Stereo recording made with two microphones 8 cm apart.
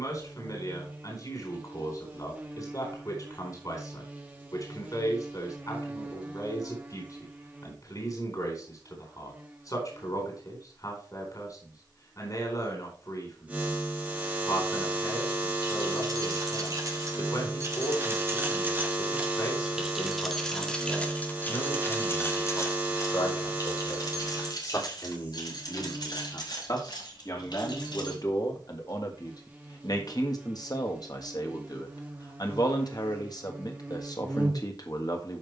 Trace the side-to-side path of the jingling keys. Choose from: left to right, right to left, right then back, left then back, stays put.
right to left.